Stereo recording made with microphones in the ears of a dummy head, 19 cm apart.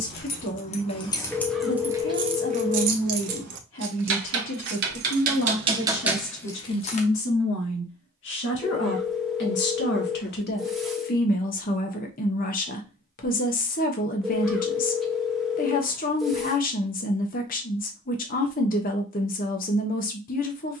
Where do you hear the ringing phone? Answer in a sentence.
You can hear the ringing phone in the centre.